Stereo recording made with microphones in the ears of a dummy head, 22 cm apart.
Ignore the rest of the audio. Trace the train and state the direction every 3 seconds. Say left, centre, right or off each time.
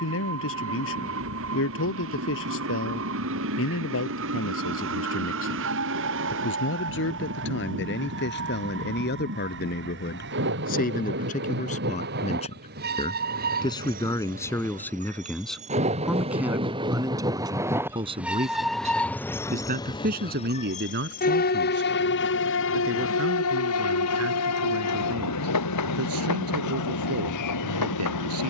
right, right, right, right, right, right, centre, left, left, left.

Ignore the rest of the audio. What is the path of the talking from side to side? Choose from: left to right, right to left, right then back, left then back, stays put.
left to right.